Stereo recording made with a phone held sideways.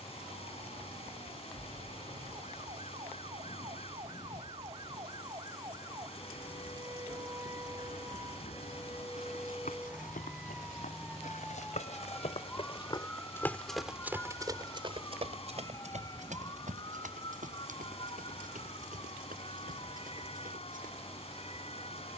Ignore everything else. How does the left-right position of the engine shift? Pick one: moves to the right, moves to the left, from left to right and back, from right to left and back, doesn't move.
doesn't move.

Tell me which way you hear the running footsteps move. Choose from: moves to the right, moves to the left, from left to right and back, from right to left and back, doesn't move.
moves to the right.